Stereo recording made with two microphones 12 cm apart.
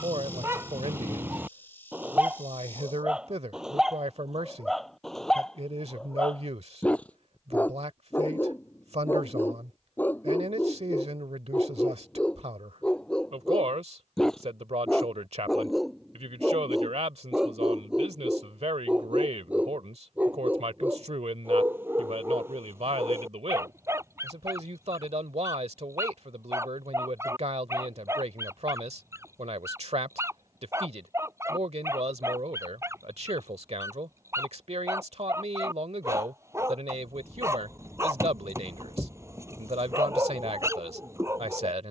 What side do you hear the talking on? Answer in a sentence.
You can hear the talking on the right.